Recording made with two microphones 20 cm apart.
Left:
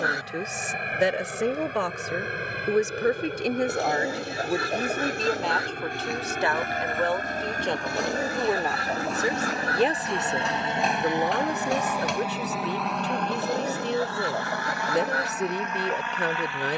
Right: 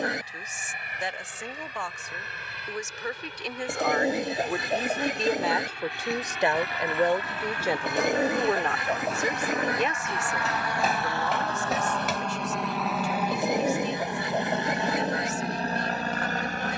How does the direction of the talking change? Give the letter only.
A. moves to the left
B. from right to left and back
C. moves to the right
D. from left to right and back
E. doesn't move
D.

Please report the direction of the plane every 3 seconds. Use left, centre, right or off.
left, left, left, left, centre, right.